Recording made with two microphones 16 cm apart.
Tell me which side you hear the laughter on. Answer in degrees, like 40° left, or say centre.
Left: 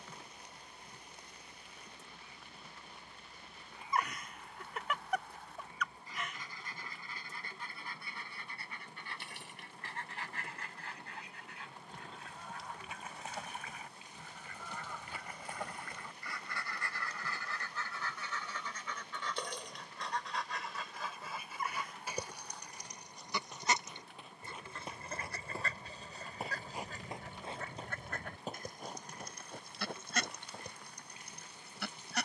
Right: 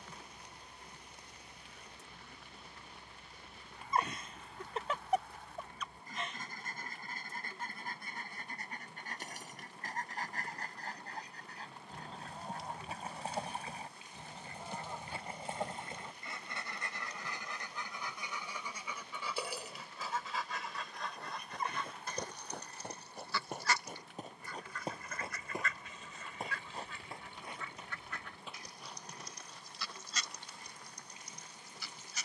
30° right.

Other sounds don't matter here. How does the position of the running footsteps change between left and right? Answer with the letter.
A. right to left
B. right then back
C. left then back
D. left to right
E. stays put
A.